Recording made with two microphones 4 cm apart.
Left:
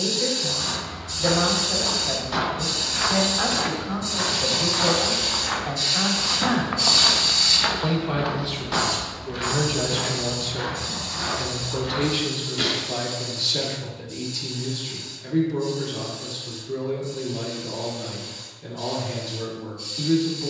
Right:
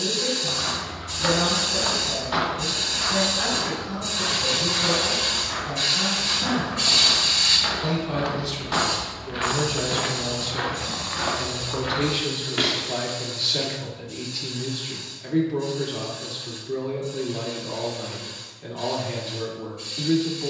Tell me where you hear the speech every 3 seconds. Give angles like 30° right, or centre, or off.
30° left, 30° left, 30° left, 10° left, 20° right, 20° right, 20° right.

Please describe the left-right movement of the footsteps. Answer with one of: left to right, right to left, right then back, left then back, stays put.
left then back.